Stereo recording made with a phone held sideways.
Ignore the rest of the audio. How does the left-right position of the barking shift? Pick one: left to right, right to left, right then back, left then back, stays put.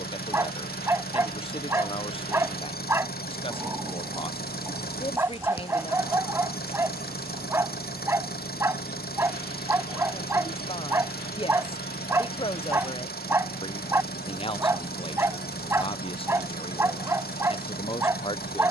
stays put.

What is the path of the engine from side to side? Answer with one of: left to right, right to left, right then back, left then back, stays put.
stays put.